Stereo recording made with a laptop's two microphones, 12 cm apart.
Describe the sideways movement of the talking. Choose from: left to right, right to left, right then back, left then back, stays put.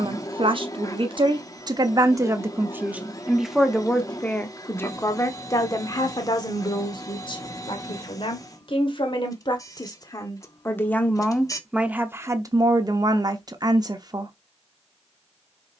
left then back.